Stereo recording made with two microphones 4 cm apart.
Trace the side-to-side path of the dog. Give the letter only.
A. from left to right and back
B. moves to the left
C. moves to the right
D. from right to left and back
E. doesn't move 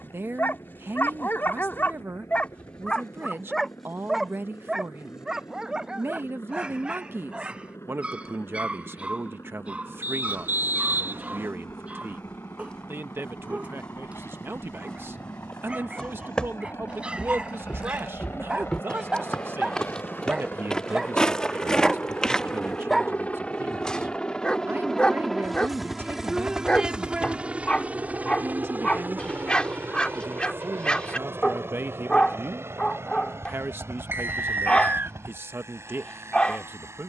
A.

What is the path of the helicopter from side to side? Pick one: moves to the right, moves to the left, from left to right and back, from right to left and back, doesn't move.
moves to the right.